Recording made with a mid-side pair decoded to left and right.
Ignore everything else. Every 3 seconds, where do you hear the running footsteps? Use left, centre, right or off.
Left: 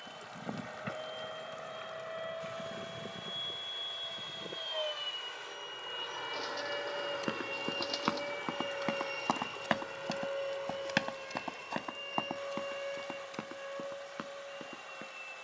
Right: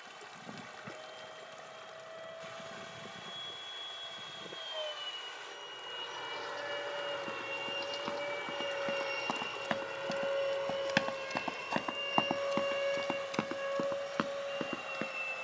off, off, left, centre, right.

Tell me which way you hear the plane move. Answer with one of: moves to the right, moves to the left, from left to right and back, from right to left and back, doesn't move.
moves to the right.